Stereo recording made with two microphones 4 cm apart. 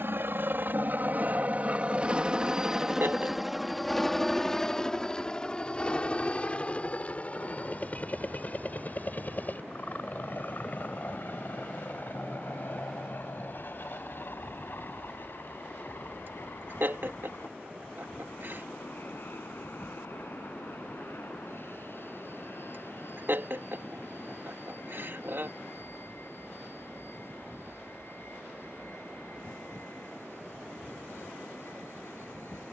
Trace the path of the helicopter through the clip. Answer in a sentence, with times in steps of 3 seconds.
In this clip you hear the helicopter on the right from 0 s, in the centre from 3 s and on the left from 6 s.